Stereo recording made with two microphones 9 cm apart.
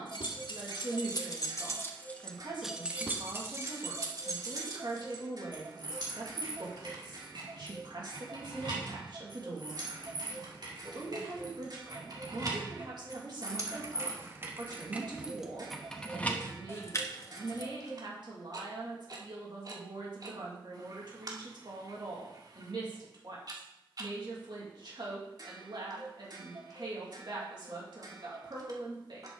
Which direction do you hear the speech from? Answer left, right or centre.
right.